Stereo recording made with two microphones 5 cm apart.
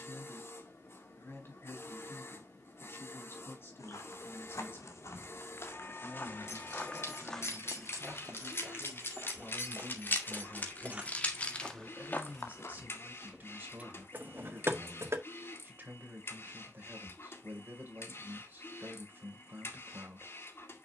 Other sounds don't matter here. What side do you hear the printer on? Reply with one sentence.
In this clip you hear the printer on the left.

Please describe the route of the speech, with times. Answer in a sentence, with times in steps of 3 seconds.
In this clip you hear the speech on the left from 0 s, in the centre from 9 s and on the right from 12 s.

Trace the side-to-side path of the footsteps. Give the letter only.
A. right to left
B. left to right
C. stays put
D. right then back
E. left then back
D.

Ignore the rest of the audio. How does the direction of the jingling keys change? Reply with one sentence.
You can hear the jingling keys move from left to right.